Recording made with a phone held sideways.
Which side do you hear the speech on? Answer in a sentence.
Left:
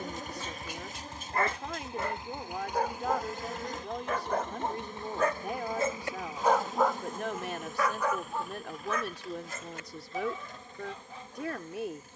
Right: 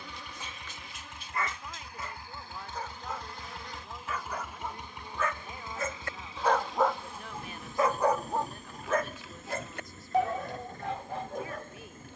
You can hear the speech on the left.